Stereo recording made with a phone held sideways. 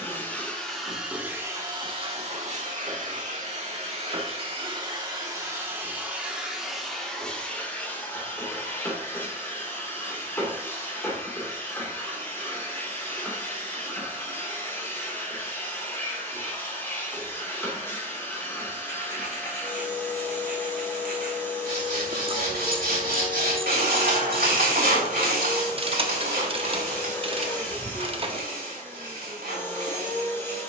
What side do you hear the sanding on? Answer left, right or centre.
right.